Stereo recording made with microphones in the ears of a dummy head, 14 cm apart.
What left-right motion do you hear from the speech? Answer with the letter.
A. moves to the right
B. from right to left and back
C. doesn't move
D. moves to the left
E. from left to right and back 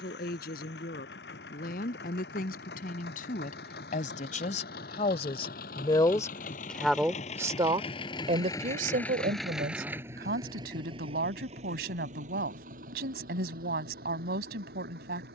A.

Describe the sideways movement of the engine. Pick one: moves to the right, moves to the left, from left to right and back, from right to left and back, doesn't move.
moves to the right.